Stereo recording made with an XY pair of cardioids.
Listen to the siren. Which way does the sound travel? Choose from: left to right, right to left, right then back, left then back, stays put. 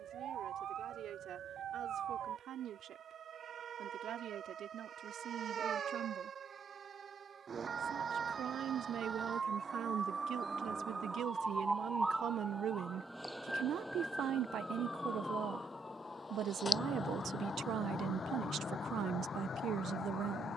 right to left.